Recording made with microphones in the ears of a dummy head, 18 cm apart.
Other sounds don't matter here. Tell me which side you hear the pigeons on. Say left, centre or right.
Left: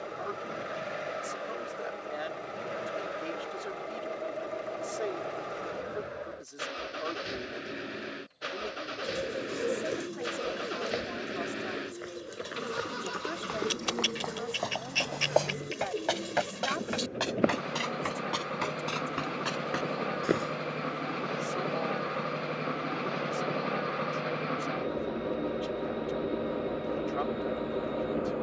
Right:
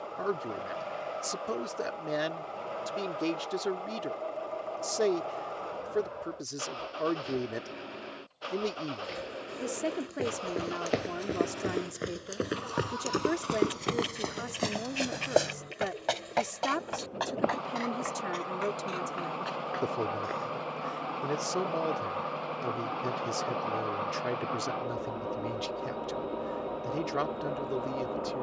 left.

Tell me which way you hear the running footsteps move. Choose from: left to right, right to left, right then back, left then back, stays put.
right to left.